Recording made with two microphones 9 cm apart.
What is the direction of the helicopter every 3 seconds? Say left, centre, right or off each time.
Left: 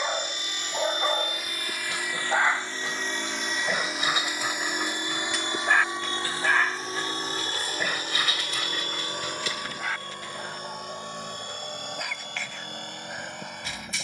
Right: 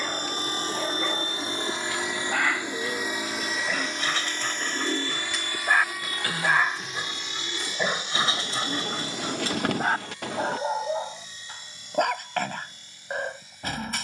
right, centre, left, left, left.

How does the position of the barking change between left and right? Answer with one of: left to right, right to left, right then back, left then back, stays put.
left to right.